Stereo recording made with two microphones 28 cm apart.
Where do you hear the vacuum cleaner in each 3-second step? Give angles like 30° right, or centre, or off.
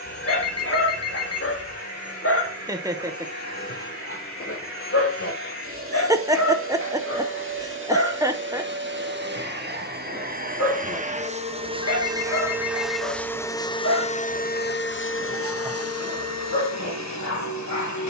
60° right, 50° right, 50° right, 30° right, 10° left, 60° left.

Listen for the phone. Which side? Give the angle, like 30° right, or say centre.
60° left.